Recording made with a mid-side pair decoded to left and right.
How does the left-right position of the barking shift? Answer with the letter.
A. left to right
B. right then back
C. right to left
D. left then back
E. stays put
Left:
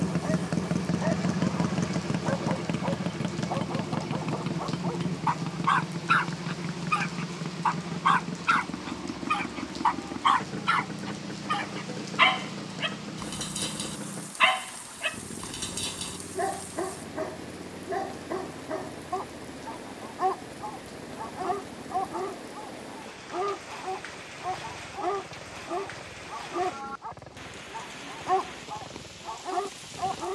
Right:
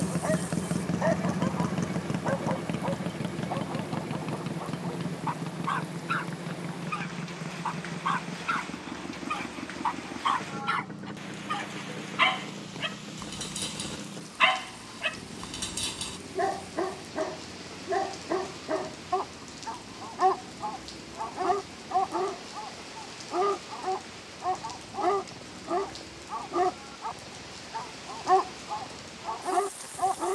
D.